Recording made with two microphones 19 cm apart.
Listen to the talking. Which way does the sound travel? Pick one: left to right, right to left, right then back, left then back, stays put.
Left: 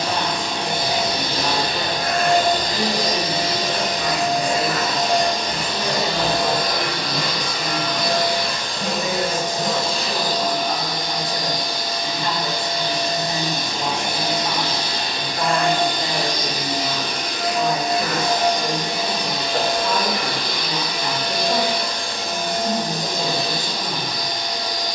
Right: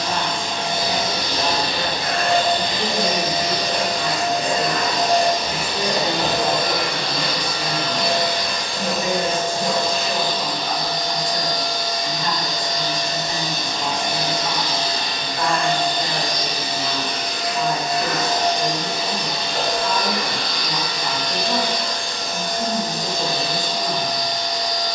right then back.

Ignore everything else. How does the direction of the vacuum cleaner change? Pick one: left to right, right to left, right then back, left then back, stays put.
right then back.